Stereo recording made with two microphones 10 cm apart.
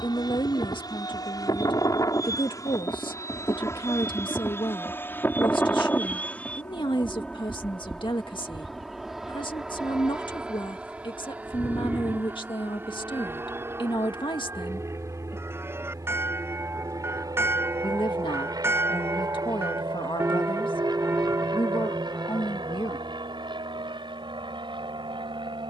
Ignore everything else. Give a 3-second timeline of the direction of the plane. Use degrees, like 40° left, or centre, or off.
40° left, 20° left, 10° left, 10° right, 20° right, 30° right, 40° right, 50° right, 50° right.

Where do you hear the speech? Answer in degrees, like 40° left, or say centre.
50° left.